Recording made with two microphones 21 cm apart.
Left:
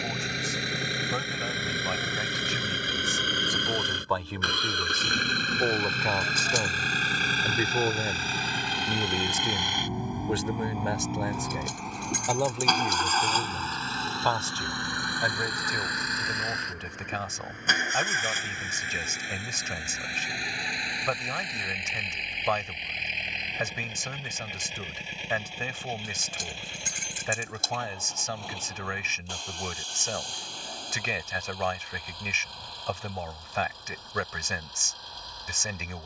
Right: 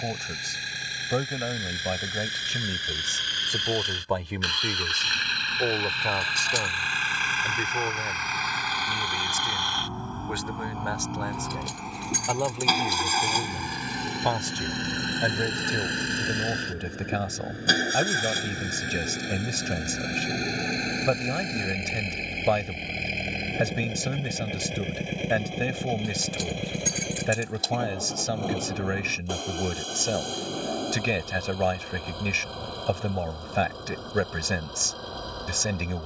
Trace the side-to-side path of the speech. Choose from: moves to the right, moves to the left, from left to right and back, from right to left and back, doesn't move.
from right to left and back.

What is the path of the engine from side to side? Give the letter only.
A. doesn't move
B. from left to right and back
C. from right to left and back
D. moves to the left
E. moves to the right
E.